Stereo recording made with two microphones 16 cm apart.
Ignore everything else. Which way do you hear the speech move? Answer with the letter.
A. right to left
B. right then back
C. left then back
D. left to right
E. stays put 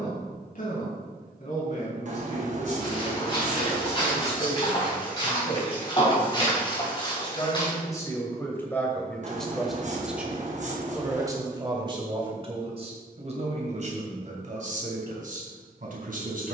D.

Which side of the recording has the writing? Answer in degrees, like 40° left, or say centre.
50° right.